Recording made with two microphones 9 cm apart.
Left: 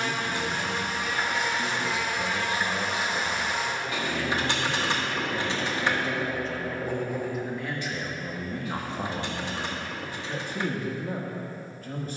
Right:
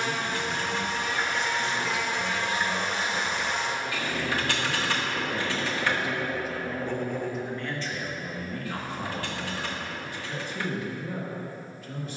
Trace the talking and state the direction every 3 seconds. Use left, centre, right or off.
left, centre, centre, left.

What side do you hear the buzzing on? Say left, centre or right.
centre.